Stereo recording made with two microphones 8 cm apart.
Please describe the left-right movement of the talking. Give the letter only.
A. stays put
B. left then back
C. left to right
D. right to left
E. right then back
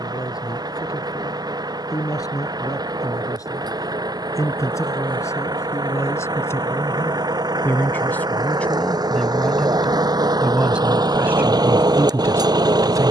C.